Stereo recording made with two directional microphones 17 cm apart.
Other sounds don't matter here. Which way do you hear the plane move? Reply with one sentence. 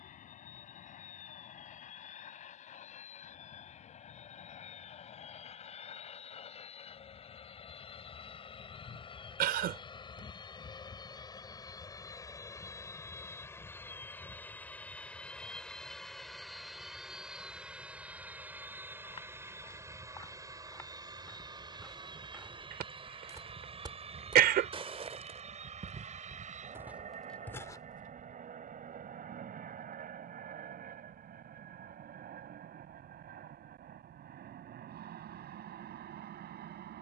You can hear the plane go from the left side to the right.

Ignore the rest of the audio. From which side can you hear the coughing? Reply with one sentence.
You can hear the coughing on the right.